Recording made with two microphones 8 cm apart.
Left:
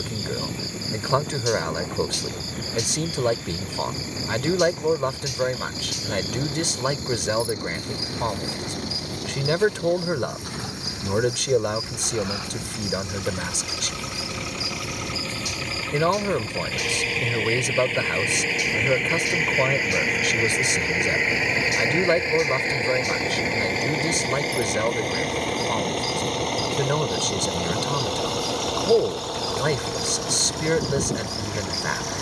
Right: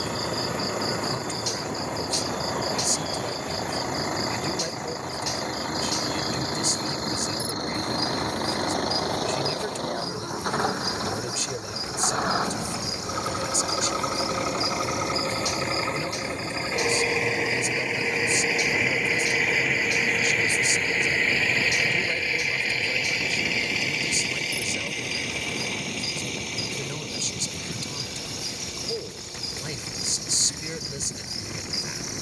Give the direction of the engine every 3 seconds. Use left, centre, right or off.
right, right, right, right, right, right, centre, left, left, left, left.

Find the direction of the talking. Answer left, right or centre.
left.